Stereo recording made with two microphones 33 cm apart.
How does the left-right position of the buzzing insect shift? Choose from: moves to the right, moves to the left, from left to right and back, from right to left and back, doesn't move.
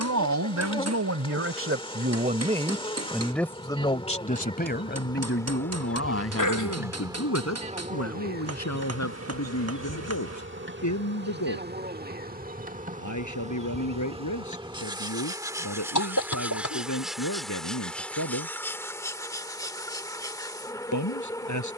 from left to right and back.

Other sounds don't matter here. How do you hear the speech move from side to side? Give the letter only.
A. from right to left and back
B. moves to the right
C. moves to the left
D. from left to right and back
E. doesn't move
C.